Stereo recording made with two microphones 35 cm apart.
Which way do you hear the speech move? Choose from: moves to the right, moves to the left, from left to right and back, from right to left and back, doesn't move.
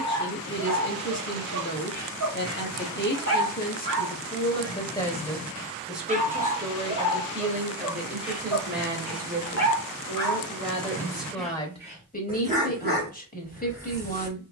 from left to right and back.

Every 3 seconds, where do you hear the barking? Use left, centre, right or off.
right, right, centre, centre, right.